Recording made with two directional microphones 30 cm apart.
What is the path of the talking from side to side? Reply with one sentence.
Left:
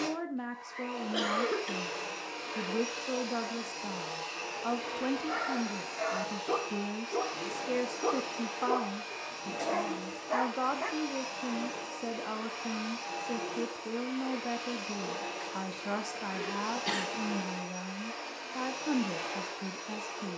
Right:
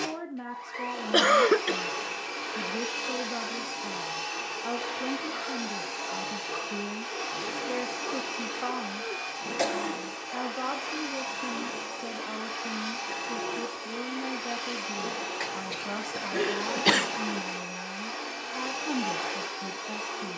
You can hear the talking stay in one place.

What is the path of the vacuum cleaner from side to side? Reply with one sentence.
You can hear the vacuum cleaner stay in one place.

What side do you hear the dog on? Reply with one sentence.
You can hear the dog on the left.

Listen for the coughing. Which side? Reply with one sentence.
You can hear the coughing on the right.